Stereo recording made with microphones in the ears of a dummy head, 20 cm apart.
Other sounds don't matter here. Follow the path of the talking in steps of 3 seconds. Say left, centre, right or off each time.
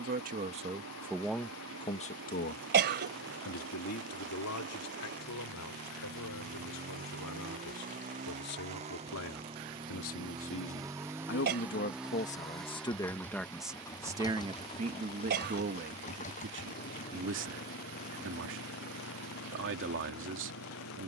centre, left, left, left, centre, right, right.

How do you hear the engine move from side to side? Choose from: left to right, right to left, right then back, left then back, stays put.
right to left.